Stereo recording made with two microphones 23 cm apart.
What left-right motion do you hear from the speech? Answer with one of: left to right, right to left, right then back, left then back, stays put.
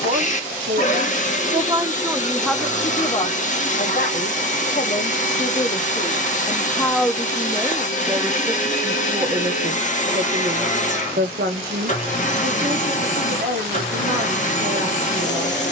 left then back.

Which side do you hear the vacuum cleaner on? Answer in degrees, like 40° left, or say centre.
30° left.